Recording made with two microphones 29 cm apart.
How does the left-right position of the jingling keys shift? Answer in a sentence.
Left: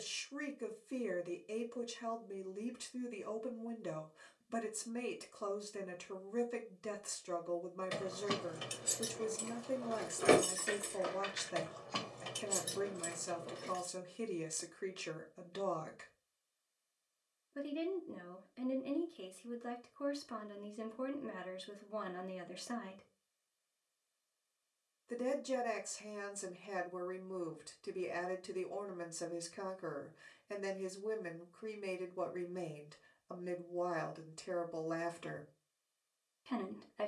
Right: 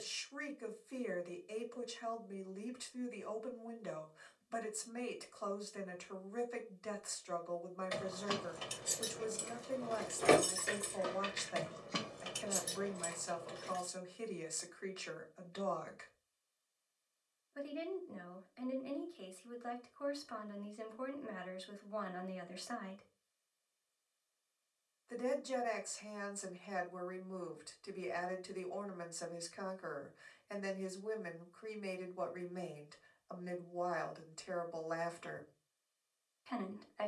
You can hear the jingling keys move from left to right and back again.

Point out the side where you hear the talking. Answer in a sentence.
You can hear the talking on the left.